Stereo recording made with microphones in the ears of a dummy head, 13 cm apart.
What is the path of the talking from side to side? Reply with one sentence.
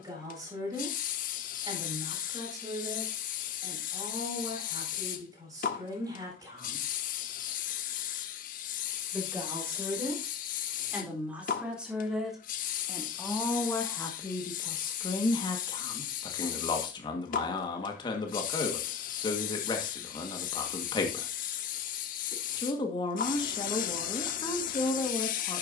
You can hear the talking go from the right side to the left.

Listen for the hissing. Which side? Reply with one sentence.
You can hear the hissing on the left.